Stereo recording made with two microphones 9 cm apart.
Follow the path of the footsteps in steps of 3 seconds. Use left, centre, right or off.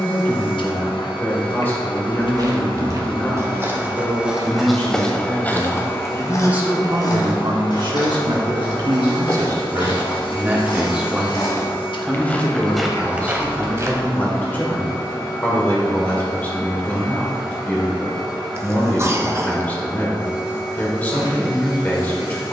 right, centre, left, left, centre, off, off, off.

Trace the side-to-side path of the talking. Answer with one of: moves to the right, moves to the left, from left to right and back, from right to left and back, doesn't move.
from left to right and back.